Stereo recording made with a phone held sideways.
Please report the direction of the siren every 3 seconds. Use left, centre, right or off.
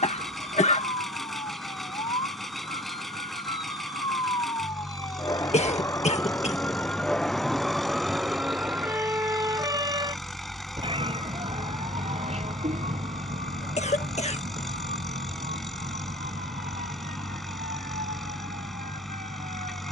left, left, centre, right, right, right, right.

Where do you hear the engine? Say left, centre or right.
centre.